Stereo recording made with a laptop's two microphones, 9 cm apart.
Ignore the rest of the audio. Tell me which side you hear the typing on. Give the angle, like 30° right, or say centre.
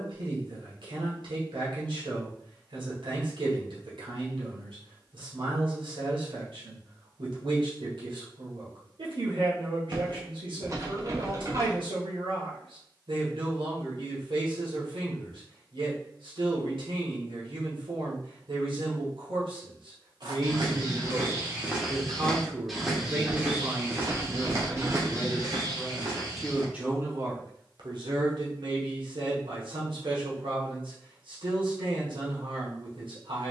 40° right.